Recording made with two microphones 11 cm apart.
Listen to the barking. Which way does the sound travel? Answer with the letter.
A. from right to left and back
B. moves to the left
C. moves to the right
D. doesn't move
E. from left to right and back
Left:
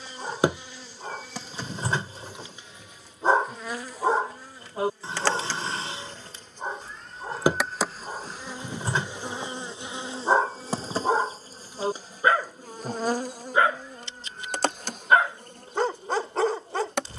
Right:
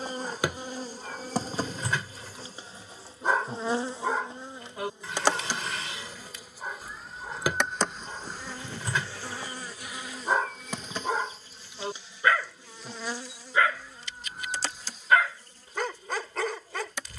D.